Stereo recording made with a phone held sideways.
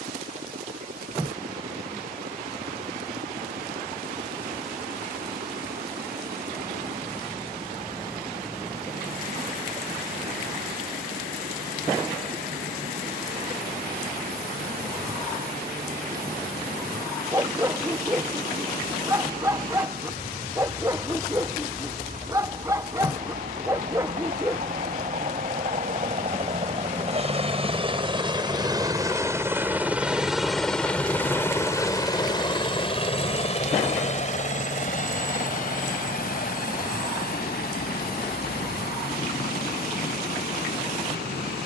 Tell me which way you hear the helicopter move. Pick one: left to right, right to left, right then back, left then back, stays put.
right to left.